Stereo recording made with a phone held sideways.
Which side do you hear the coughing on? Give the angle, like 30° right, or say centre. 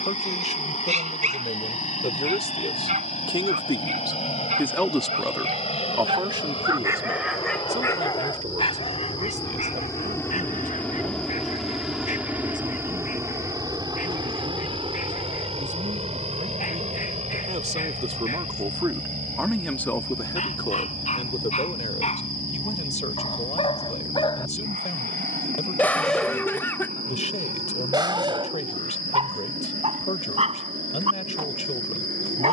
20° left.